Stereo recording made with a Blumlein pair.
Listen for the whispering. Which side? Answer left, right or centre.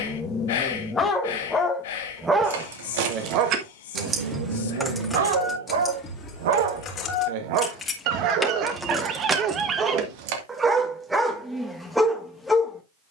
left.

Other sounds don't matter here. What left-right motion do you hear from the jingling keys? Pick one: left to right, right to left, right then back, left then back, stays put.
left then back.